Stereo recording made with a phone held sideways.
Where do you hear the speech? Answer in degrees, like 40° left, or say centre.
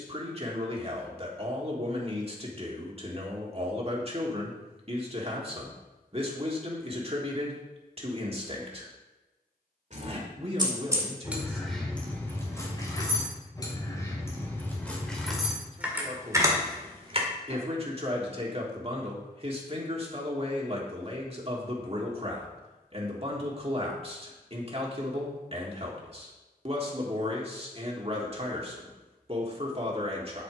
40° right.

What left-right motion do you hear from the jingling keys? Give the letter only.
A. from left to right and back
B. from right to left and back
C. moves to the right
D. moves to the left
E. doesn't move
B.